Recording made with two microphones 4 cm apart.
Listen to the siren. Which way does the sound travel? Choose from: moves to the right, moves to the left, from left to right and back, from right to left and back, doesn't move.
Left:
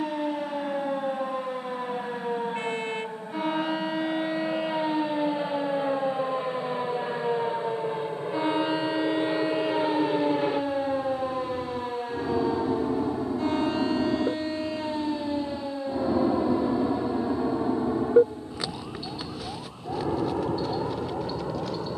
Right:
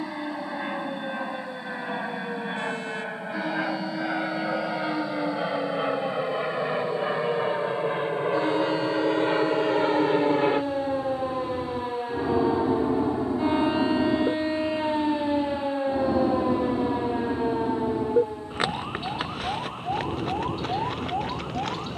moves to the right.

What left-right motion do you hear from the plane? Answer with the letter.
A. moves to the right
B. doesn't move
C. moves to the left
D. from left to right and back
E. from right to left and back
C.